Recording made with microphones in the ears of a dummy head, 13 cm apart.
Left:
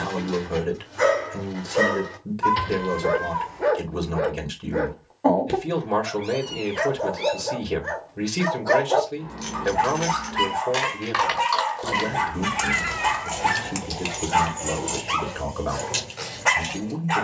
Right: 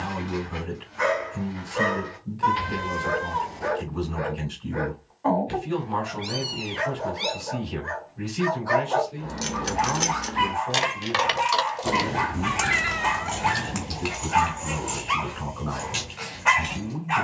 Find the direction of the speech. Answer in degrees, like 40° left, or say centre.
70° left.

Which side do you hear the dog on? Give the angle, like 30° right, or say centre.
50° left.